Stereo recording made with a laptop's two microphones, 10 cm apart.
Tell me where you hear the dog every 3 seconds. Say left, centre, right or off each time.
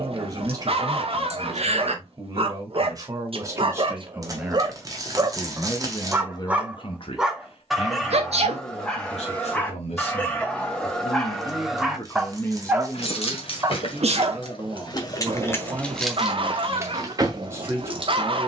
right, right, centre, centre, right, right.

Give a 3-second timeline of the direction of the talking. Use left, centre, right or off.
right, centre, left, left, centre, right.